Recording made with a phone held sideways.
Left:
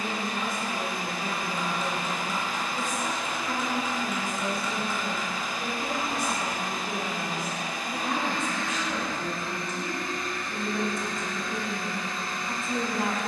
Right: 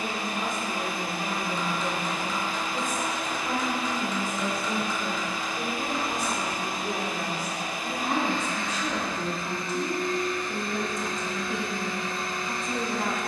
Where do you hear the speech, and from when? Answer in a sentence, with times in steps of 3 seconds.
You can hear the speech on the right from 0 s and in the centre from 12 s.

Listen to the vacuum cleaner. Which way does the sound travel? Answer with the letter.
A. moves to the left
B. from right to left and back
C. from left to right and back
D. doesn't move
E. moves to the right
D.